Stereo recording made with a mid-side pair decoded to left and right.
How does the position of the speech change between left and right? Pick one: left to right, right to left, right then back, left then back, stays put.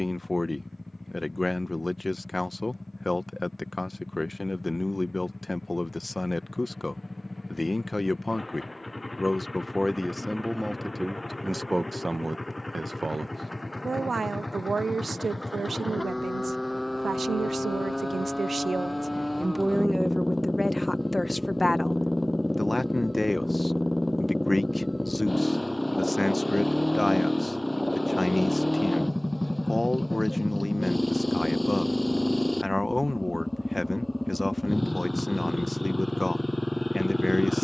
right then back.